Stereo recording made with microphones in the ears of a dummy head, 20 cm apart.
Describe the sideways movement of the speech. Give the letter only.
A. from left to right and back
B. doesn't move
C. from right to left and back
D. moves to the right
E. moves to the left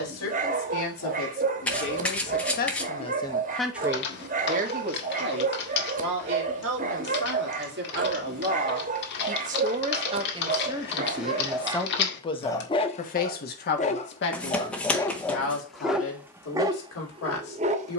A.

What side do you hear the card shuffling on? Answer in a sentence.
In this clip you hear the card shuffling in the centre.